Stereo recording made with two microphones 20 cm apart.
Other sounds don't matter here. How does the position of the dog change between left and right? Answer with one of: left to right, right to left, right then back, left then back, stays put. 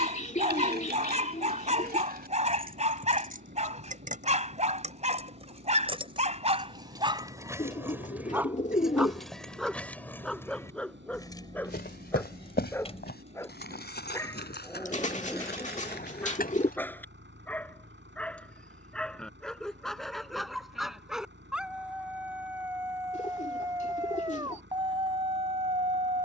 left then back.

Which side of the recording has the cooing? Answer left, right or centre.
left.